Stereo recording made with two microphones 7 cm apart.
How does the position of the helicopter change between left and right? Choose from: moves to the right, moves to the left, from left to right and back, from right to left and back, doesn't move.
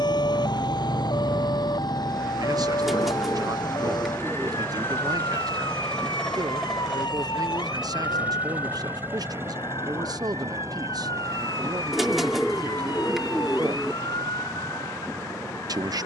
moves to the right.